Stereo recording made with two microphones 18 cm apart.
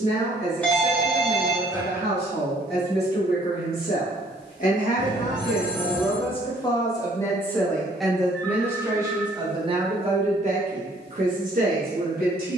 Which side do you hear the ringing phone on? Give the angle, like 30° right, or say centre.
10° left.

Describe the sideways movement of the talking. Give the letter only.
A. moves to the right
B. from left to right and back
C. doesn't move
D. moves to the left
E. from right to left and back
A.